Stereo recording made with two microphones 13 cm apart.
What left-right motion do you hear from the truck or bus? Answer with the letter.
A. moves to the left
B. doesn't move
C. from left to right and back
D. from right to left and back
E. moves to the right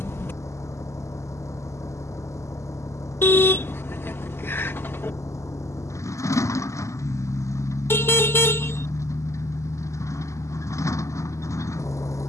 B.